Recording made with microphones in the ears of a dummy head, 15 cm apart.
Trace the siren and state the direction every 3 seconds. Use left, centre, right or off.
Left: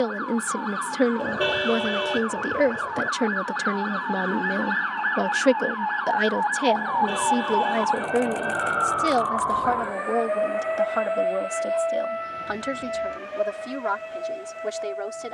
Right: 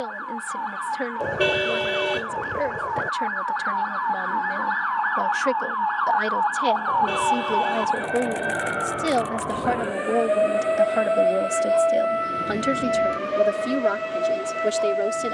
left, left, centre, right, right.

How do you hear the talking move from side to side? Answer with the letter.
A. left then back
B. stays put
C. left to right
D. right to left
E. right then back
C.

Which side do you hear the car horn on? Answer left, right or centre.
right.